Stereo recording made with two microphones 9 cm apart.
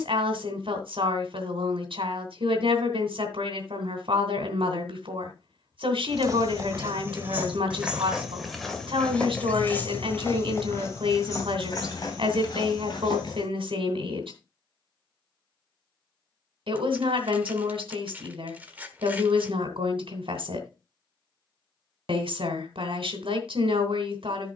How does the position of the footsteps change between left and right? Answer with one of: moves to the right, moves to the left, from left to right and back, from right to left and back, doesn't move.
moves to the left.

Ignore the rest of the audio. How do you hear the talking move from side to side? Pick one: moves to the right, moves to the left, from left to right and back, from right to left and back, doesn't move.
doesn't move.